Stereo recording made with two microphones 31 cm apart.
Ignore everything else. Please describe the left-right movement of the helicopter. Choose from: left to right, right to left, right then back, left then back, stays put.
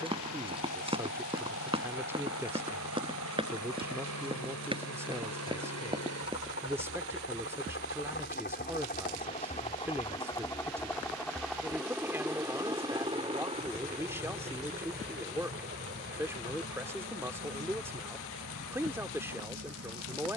left to right.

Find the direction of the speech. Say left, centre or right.
centre.